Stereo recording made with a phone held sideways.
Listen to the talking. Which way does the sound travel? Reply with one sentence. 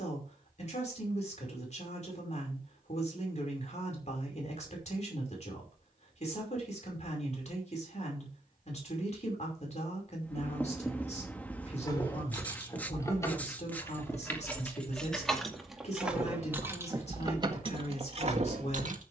You can hear the talking stay in one place.